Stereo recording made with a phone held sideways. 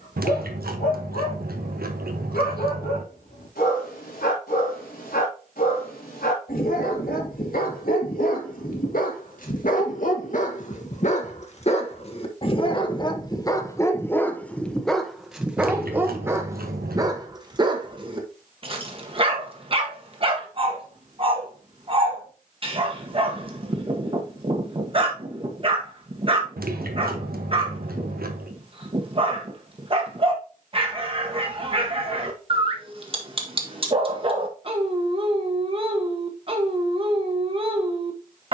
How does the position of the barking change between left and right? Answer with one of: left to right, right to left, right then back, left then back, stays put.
left to right.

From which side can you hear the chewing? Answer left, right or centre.
right.